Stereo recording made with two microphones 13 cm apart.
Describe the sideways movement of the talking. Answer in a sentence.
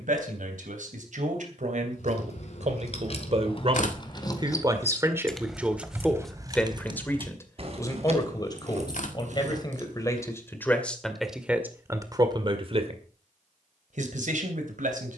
You can hear the talking move from right to left and back again.